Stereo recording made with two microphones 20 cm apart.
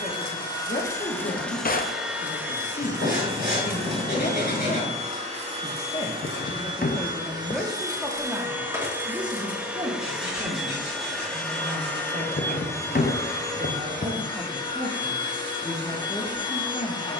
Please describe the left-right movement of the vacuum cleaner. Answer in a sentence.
In this clip you hear the vacuum cleaner go right and come back.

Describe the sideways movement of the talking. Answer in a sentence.
You can hear the talking move from left to right and back again.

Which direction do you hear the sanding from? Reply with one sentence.
In this clip you hear the sanding on the left.